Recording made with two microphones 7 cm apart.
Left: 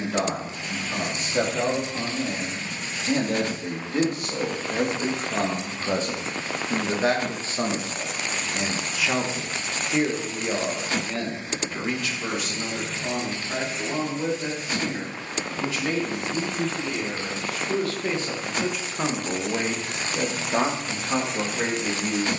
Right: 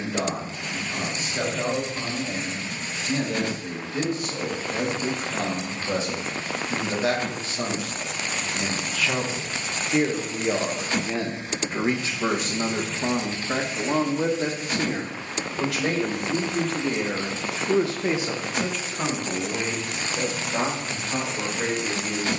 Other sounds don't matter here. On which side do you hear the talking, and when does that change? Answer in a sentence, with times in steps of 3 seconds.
In this clip you hear the talking on the left from 0 s, in the centre from 9 s, on the right from 12 s and on the left from 18 s.